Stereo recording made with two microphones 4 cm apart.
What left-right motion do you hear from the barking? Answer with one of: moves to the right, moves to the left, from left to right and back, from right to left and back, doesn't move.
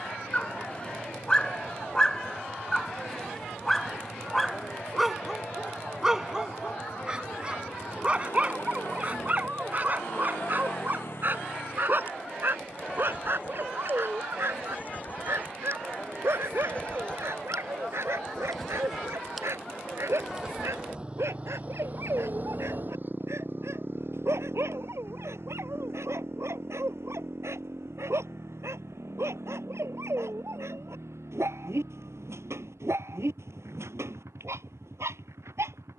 moves to the right.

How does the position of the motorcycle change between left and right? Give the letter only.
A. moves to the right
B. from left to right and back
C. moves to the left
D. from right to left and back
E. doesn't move
A.